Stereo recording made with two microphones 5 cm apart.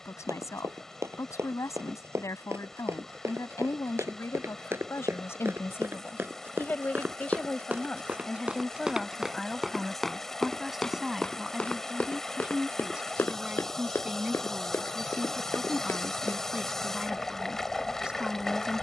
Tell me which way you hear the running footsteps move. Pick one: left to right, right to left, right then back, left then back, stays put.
right to left.